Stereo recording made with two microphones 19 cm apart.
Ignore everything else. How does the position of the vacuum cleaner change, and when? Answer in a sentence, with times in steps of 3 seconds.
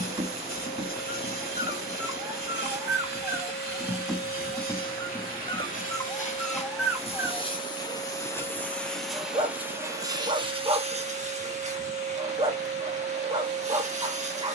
You can hear the vacuum cleaner on the left from 0 s and on the right from 9 s.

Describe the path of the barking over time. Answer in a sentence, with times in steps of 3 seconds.
You can hear the barking on the right from 0 s, in the centre from 3 s and on the right from 9 s.